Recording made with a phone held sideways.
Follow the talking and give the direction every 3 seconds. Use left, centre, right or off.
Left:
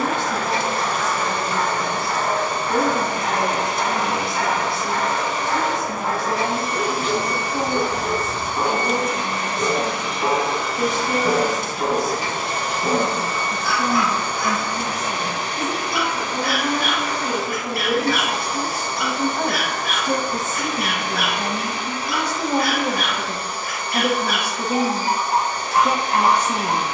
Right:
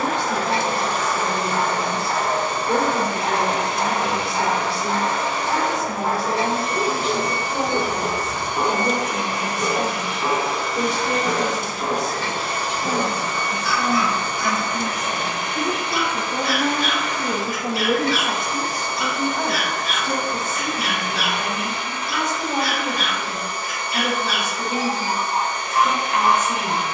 right, right, right, right, right, right, centre, left, left.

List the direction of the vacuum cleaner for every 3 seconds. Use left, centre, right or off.
right, right, right, centre, left, left, left, left, left.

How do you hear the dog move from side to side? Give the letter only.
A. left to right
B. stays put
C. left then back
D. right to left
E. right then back
D.